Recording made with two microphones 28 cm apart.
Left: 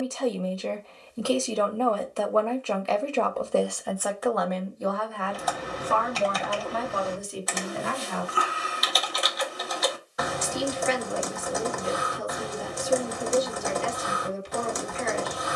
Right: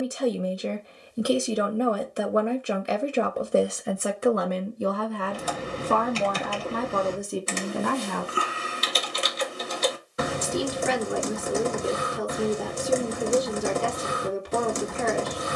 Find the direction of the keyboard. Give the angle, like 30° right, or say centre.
30° right.